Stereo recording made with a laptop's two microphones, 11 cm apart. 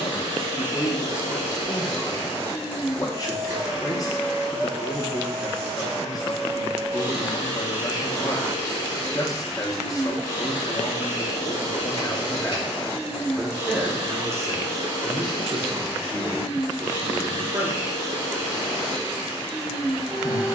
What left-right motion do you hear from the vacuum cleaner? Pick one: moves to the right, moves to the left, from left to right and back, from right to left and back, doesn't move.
doesn't move.